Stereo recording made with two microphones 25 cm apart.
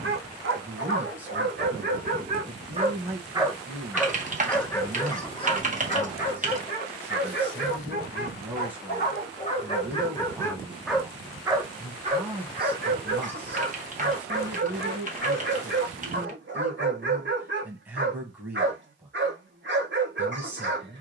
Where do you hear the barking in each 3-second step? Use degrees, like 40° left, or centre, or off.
40° right, 10° left, 40° left, 20° left, 40° right, 50° right, 50° right.